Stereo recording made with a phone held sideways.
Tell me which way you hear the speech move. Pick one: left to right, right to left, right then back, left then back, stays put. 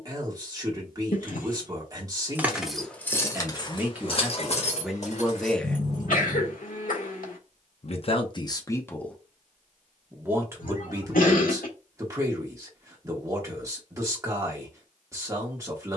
left then back.